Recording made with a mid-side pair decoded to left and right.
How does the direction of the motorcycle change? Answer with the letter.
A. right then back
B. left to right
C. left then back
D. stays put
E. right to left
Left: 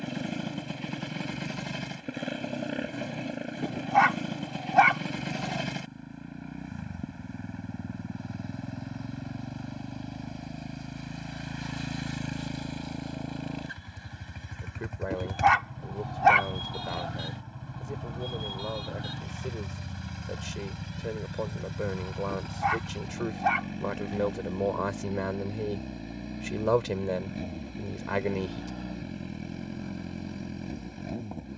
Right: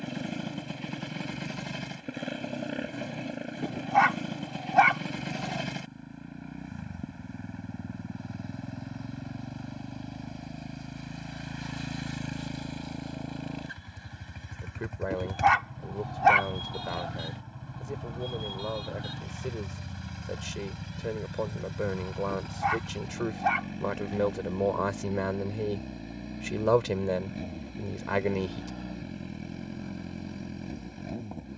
D.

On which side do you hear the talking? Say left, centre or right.
centre.